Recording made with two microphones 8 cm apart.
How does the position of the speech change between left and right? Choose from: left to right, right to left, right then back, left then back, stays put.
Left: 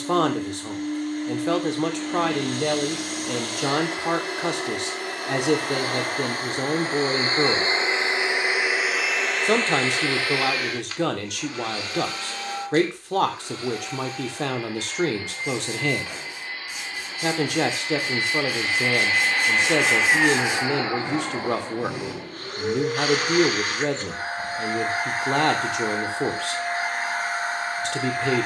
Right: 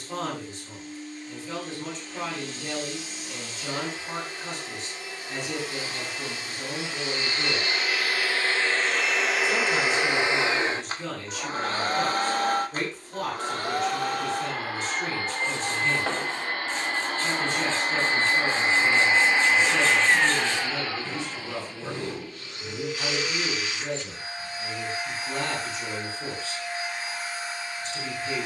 stays put.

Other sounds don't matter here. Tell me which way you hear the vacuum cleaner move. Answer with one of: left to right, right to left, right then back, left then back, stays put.
right then back.